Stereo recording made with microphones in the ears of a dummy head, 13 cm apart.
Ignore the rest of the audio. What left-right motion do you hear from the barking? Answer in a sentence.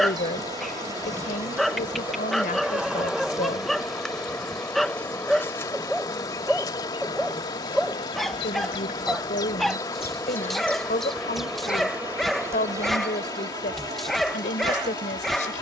You can hear the barking stay put.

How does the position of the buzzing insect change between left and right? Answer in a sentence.
In this clip you hear the buzzing insect move from right to left and back again.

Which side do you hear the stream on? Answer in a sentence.
You can hear the stream on the left.